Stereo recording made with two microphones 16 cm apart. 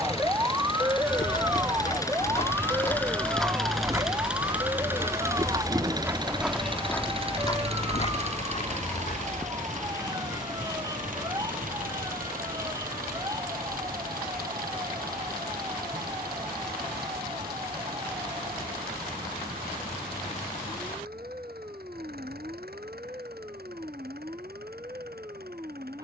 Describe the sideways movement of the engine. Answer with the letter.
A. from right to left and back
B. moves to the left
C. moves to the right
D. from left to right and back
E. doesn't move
C.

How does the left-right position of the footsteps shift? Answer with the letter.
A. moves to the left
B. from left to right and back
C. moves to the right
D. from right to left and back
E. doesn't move
B.